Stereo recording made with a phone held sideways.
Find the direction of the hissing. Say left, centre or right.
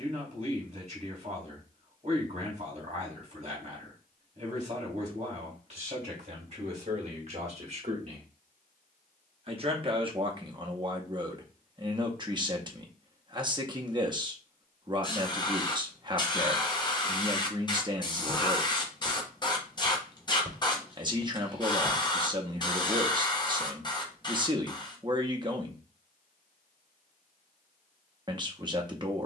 left.